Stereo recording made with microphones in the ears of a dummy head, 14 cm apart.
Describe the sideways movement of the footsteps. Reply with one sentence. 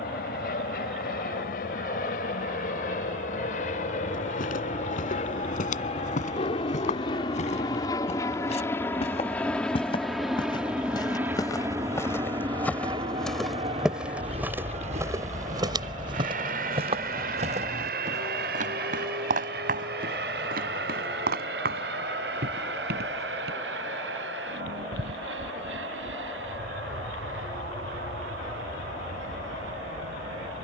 You can hear the footsteps go from the left side to the right.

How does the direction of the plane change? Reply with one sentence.
You can hear the plane move to the right.